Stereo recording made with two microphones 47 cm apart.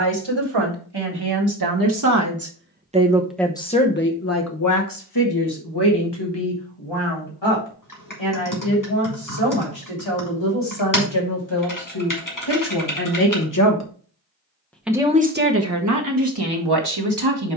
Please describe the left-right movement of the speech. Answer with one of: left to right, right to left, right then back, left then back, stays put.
left then back.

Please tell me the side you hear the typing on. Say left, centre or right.
left.